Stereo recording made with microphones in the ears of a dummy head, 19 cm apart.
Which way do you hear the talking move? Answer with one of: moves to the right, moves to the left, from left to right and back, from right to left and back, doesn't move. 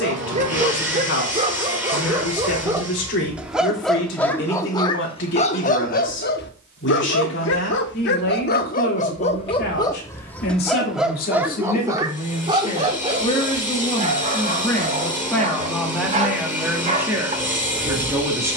moves to the right.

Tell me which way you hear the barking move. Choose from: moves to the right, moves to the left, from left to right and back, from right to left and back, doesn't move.
from right to left and back.